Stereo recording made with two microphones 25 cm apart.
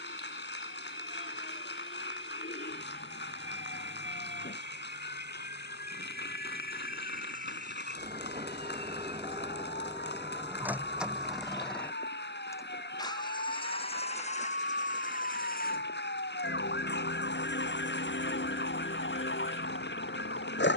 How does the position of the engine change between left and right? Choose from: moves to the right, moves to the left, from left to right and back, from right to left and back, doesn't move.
moves to the left.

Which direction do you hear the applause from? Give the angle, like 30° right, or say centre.
50° left.